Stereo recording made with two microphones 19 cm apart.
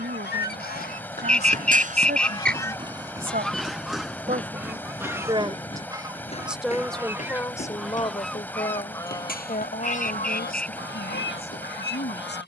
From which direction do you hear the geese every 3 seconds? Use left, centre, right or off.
left, centre, centre, left.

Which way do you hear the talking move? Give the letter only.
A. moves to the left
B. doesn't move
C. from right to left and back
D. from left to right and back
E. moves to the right
A.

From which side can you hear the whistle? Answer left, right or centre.
centre.